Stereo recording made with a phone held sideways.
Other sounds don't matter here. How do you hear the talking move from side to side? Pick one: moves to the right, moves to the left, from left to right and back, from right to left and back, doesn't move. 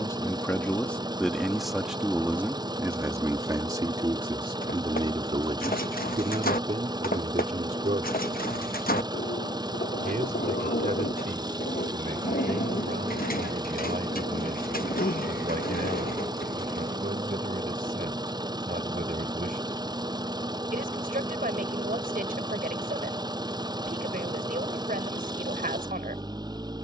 moves to the right.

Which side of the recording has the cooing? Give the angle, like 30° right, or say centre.
70° left.